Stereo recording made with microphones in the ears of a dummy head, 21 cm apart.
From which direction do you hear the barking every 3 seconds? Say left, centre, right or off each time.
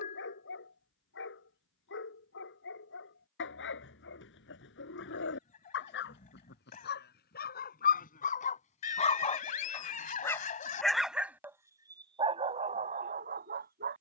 left, left, left, centre, right.